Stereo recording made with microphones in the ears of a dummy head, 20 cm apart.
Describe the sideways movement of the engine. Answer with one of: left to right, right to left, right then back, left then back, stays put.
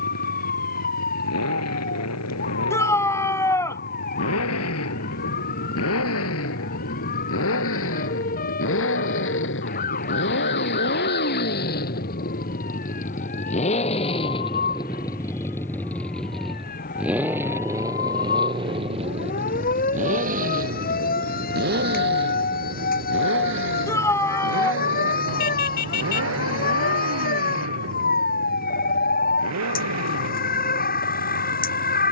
left to right.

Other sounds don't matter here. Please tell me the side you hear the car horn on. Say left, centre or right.
left.